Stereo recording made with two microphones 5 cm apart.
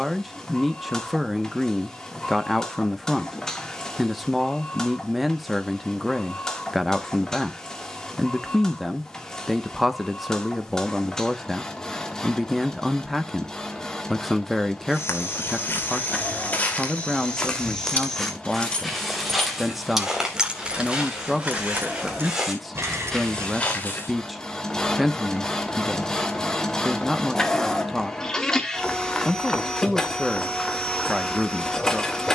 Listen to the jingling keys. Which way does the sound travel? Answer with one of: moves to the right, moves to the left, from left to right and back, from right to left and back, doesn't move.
moves to the right.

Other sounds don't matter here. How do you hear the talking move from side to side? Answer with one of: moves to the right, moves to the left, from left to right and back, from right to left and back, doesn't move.
doesn't move.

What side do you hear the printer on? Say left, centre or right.
centre.